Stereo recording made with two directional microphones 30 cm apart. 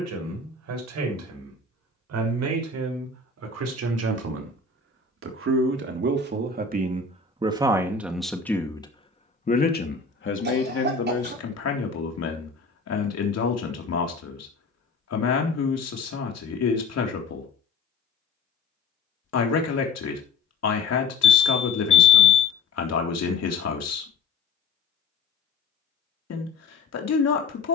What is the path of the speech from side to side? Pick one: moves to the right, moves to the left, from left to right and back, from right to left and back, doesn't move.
moves to the left.